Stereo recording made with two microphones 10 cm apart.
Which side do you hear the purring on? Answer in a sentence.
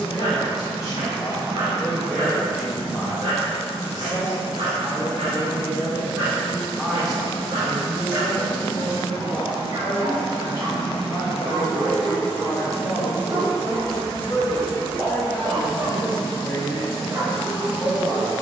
You can hear the purring on the left.